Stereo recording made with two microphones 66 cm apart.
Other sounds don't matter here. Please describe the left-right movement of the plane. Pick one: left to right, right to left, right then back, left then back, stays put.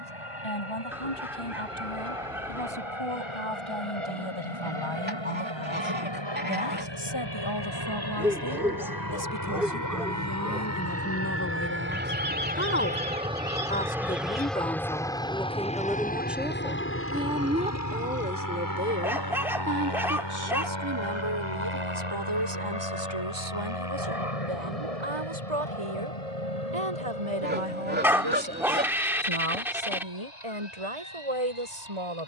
right to left.